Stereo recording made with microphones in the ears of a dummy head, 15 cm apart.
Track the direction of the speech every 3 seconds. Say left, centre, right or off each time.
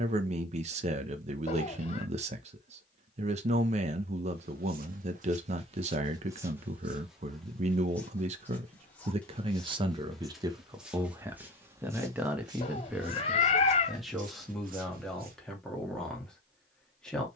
right, right, right, right, centre, centre.